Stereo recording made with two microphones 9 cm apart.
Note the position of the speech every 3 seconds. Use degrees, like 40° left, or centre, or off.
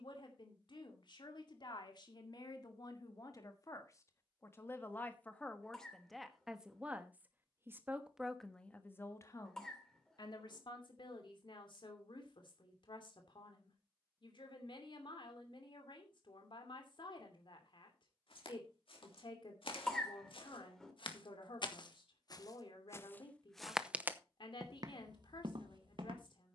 50° left, 30° left, centre, 50° left, 60° left, 60° left, 60° left, 60° left, 60° left.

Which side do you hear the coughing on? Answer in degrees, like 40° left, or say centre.
10° left.